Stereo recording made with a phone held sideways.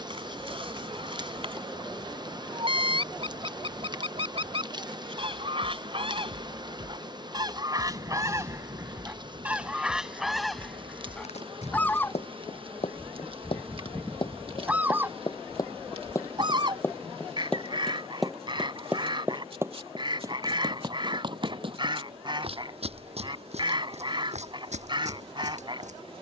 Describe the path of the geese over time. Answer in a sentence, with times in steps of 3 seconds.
In this clip you hear the geese on the right from 0 s, in the centre from 9 s and on the right from 15 s.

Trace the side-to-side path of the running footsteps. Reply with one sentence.
In this clip you hear the running footsteps move to the right.